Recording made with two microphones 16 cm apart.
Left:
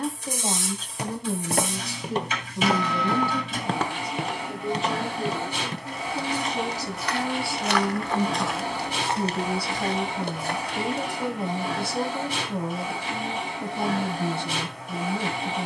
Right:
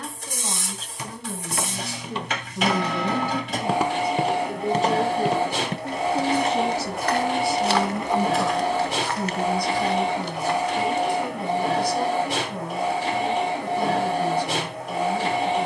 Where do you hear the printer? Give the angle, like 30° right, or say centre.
70° right.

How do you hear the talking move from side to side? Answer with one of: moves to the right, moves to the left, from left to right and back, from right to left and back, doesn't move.
from left to right and back.